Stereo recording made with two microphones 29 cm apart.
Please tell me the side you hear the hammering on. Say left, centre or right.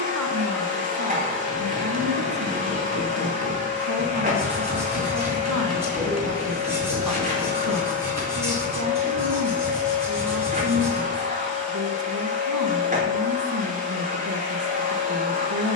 right.